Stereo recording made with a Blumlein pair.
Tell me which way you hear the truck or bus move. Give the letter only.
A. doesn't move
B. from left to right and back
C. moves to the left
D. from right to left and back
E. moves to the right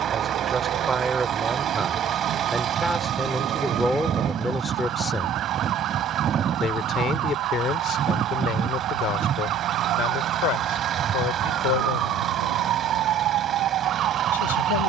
A.